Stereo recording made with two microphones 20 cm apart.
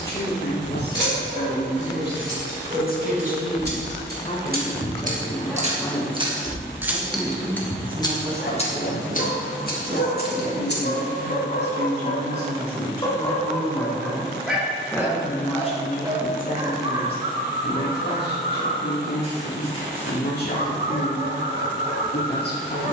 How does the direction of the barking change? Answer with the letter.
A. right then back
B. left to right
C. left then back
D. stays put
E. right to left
C.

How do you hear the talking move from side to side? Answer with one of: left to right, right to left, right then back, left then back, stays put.
right then back.